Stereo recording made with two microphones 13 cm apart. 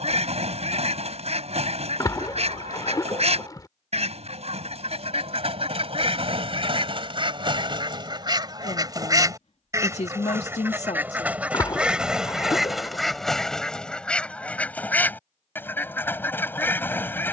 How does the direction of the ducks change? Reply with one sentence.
In this clip you hear the ducks travel towards the left.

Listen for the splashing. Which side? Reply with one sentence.
You can hear the splashing on the left.